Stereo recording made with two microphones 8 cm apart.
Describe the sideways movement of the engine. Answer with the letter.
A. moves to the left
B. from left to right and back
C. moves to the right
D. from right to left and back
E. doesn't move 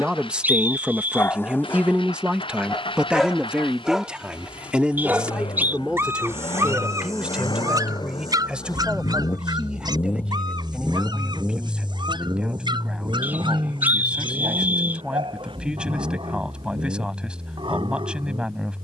C.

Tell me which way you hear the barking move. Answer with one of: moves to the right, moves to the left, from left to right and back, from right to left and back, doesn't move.
moves to the right.